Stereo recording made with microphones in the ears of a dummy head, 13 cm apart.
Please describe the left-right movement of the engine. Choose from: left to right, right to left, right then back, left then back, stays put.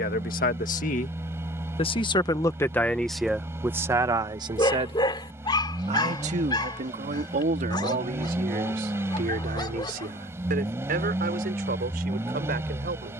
stays put.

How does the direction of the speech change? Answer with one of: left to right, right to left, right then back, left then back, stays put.
left to right.